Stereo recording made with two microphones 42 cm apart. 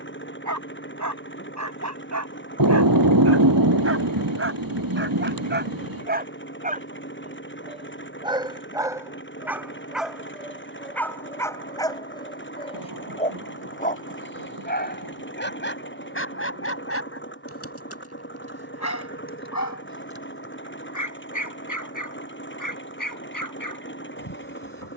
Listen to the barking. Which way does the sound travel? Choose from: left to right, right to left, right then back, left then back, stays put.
right to left.